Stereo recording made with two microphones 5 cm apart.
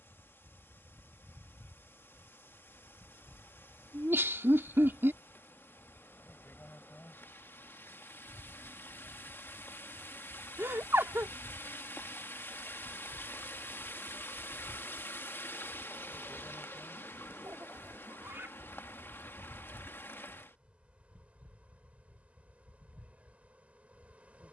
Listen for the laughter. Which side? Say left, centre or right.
right.